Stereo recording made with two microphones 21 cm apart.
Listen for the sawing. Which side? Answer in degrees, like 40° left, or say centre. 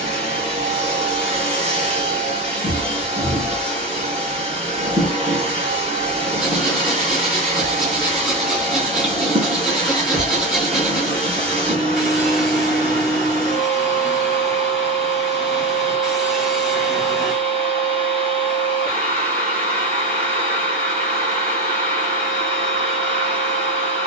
centre.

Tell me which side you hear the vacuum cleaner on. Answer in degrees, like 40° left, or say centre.
30° right.